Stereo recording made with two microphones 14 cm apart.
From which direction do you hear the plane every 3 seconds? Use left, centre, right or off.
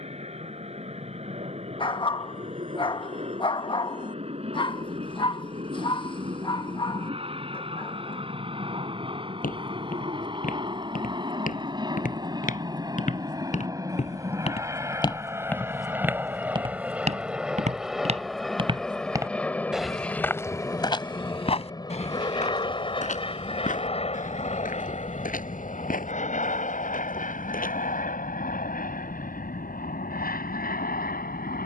right, right, right, right, right, centre, centre, left, left, left, left.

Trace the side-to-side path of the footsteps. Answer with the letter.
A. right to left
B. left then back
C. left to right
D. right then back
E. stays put
D.